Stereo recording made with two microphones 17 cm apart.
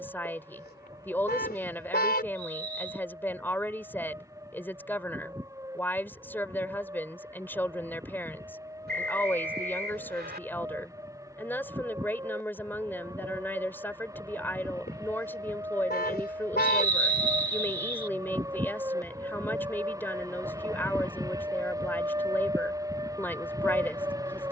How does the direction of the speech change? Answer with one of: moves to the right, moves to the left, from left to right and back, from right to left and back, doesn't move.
doesn't move.